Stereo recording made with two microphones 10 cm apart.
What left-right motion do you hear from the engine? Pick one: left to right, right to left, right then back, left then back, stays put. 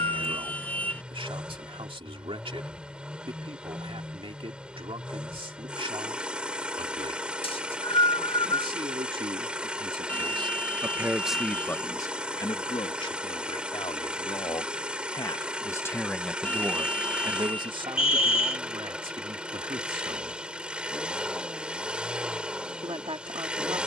stays put.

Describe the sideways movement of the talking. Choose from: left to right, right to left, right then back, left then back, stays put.
left then back.